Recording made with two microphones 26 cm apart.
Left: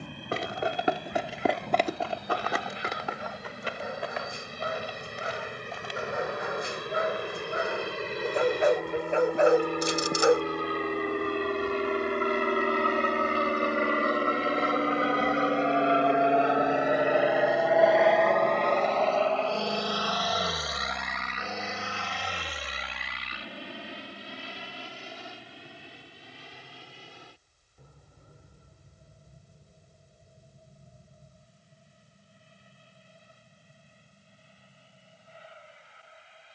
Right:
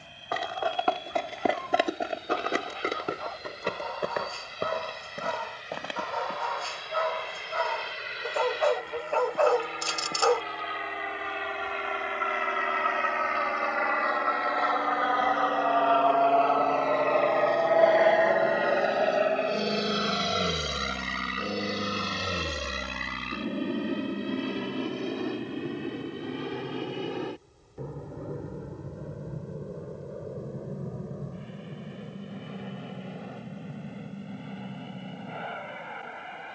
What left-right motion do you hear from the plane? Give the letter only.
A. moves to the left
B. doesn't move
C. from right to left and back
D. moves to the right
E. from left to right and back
D.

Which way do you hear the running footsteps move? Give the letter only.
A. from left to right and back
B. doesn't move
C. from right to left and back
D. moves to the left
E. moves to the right
E.